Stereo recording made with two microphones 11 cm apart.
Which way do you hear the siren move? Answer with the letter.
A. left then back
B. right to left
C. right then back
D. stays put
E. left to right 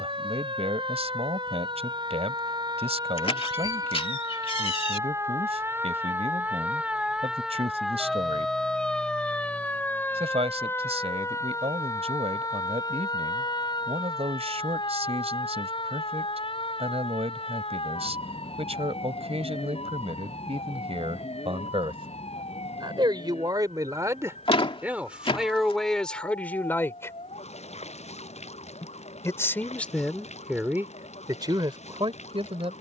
B.